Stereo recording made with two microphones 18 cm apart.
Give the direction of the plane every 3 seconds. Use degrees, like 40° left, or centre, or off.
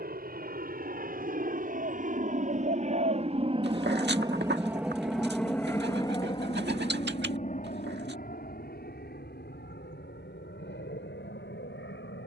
60° right, 10° right, 40° left, 60° left.